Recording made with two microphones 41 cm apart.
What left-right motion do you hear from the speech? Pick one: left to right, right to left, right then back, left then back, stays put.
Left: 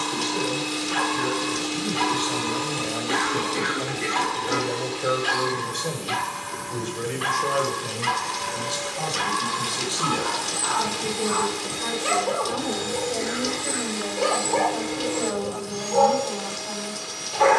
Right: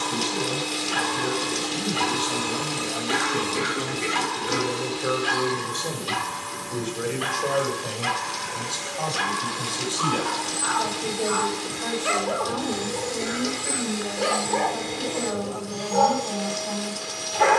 left then back.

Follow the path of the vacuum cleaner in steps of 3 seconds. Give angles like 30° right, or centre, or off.
20° left, 20° right, 40° right, 30° right, centre, 20° left.